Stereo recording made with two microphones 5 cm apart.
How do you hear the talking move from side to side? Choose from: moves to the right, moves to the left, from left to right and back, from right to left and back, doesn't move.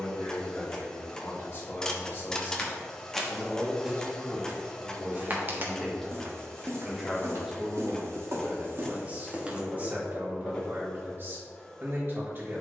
moves to the right.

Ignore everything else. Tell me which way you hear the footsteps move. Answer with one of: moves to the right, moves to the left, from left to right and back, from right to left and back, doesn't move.
from left to right and back.